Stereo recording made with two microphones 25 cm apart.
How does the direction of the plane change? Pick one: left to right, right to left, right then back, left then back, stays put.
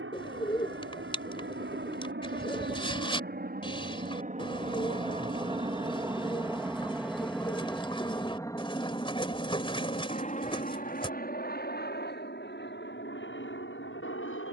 right to left.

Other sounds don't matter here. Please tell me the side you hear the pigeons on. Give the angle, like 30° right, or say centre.
20° left.